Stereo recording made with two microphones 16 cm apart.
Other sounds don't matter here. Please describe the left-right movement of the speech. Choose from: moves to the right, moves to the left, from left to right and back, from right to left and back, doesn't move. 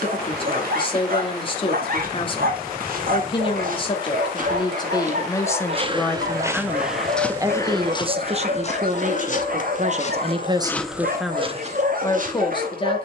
from left to right and back.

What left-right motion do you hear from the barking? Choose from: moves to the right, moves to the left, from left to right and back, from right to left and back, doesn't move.
doesn't move.